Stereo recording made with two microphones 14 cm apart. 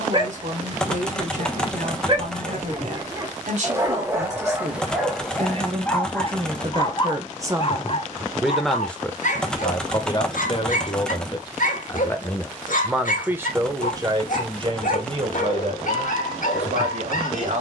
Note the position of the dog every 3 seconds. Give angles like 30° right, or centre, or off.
30° right, 10° right, 40° left, 70° left, 70° left, 70° left.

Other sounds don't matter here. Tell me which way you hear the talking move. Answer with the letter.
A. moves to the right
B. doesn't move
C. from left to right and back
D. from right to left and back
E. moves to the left
D.